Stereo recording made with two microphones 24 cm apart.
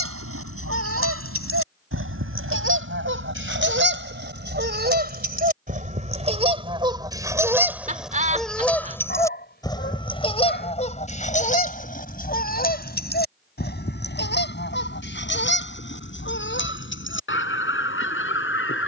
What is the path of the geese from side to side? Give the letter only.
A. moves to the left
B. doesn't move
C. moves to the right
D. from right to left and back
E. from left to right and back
A.